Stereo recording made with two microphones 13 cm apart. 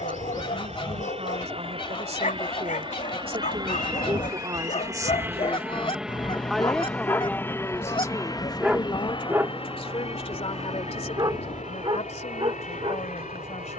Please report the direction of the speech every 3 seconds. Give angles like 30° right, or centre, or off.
60° right, 30° right, 20° left, 50° left, 60° left.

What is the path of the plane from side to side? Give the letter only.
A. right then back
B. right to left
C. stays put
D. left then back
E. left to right
B.